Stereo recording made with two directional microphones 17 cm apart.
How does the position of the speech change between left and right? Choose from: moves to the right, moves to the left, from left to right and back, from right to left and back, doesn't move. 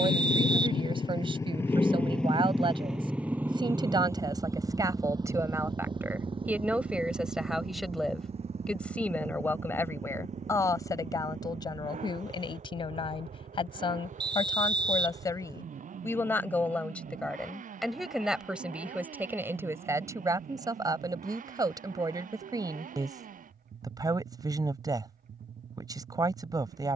from right to left and back.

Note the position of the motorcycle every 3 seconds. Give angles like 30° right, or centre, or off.
20° left, 20° right, 30° right, 40° right, 40° right, 50° right, 50° right, 50° right, 50° right.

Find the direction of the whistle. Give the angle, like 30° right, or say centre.
30° right.